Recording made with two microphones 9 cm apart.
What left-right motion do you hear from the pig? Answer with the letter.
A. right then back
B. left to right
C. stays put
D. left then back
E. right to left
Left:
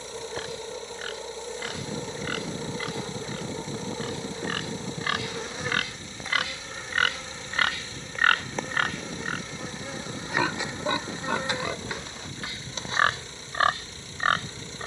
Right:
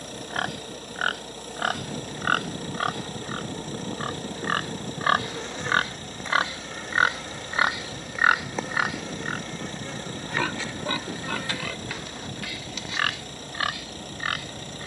E.